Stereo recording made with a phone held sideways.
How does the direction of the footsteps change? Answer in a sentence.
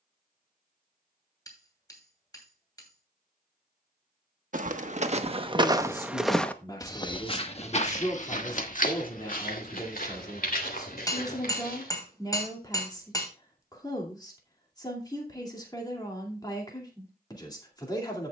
You can hear the footsteps move from right to left.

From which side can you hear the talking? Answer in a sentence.
You can hear the talking on the left.